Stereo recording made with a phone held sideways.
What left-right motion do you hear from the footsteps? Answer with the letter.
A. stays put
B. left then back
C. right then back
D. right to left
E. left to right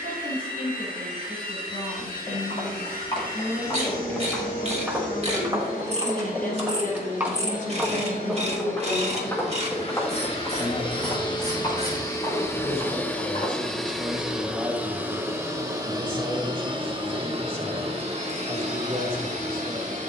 C.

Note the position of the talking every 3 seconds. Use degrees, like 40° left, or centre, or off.
70° left, 70° left, 50° left, 30° left, 10° right, 30° right, 40° right.